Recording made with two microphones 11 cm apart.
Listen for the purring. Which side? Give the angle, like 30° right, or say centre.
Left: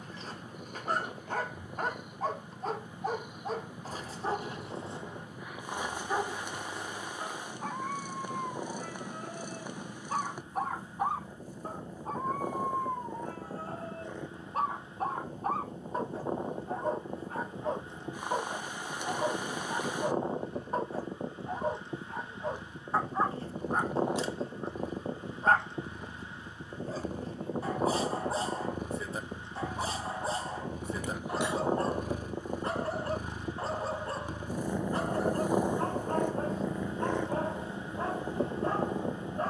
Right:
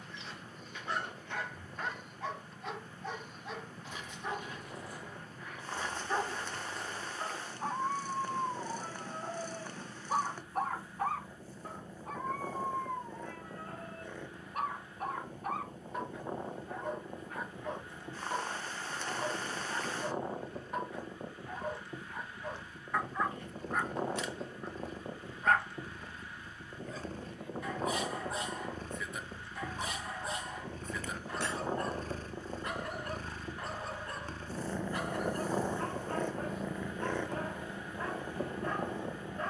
10° left.